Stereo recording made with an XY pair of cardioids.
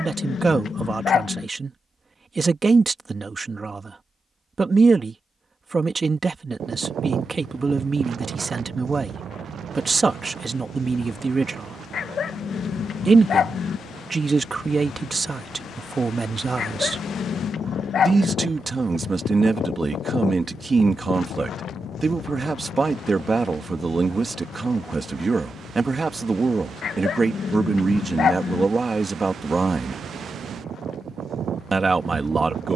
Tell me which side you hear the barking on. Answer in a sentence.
You can hear the barking on the left.